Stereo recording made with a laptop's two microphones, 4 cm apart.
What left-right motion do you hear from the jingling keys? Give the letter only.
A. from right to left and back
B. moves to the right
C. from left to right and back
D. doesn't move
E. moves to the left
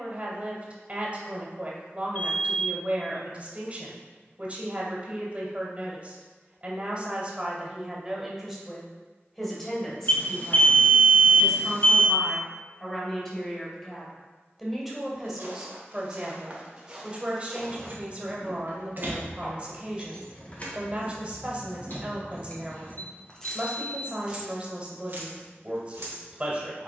A.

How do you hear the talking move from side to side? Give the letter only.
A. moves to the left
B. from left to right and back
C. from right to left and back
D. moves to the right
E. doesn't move
C.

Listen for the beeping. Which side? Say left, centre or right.
left.